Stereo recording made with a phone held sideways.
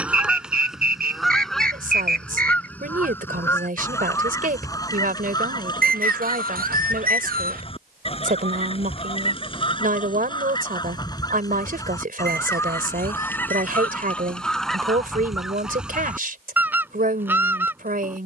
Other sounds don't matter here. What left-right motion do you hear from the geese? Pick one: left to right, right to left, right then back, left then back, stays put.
left then back.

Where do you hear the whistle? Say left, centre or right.
right.